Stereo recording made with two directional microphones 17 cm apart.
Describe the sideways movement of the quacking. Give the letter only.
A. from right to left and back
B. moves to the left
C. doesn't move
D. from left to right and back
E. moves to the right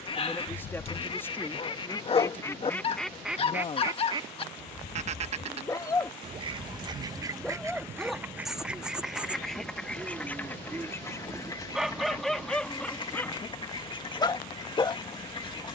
D.